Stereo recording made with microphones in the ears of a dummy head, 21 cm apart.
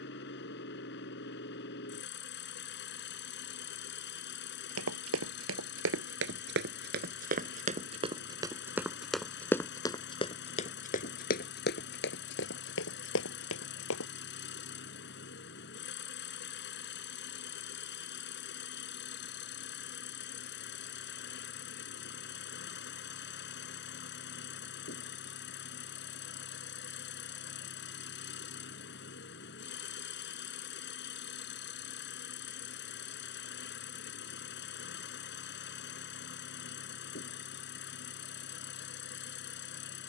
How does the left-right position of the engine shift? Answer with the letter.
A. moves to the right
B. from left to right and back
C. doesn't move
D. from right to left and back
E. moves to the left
C.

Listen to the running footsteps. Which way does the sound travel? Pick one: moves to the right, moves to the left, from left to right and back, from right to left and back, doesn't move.
moves to the left.